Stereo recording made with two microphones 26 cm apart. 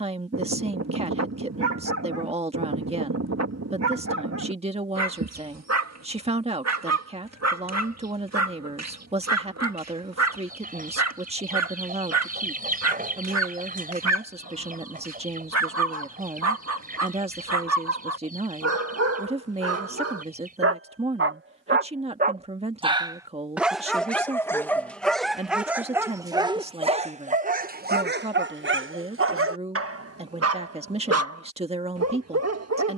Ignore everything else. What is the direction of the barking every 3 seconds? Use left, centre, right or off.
right, right, right, right, right, right, right, right, centre, right, right.